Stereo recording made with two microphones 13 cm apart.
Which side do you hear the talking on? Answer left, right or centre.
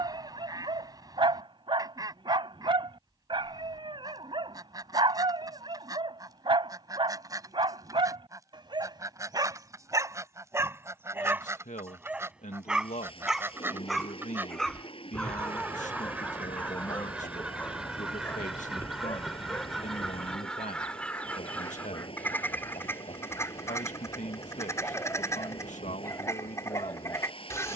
left.